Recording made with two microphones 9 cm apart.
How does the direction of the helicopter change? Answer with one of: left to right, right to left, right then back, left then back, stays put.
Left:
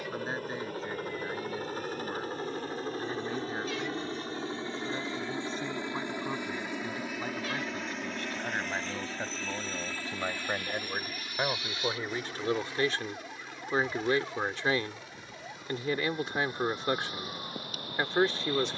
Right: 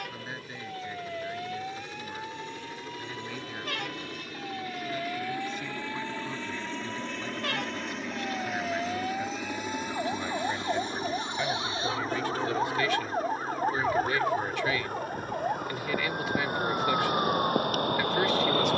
left to right.